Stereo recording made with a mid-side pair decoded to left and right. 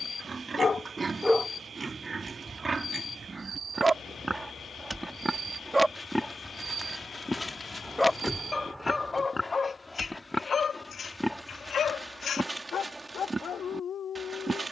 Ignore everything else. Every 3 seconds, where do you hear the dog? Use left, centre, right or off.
centre, right, centre, left, left.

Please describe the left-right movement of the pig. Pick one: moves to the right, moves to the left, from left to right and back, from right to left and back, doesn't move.
from right to left and back.